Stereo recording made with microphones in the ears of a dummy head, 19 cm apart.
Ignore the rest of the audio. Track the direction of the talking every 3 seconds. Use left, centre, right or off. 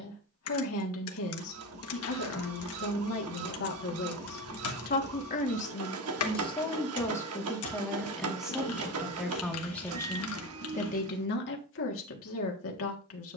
left, left, centre, left, left.